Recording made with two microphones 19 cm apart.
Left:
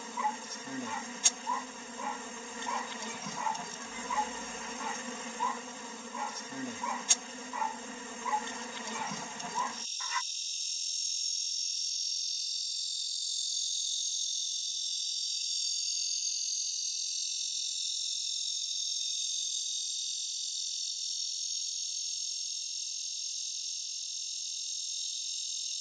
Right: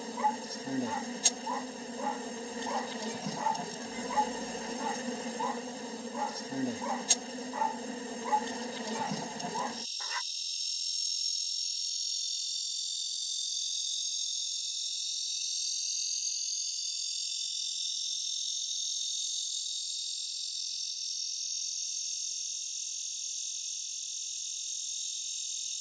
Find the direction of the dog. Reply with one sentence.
You can hear the dog on the right.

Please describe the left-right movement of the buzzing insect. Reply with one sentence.
You can hear the buzzing insect move to the left.